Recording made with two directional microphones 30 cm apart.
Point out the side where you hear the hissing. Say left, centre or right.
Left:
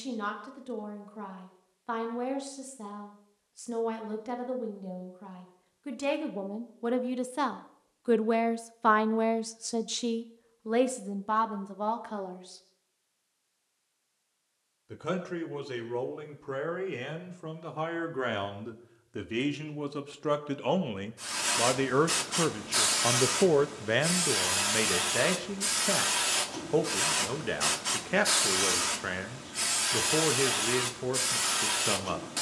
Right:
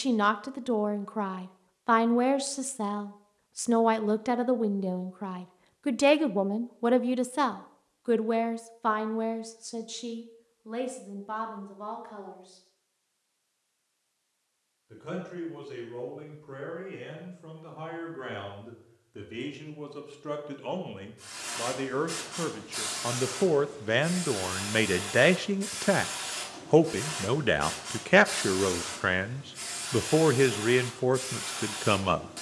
left.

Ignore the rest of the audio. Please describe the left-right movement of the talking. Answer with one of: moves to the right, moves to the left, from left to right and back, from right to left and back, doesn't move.
from right to left and back.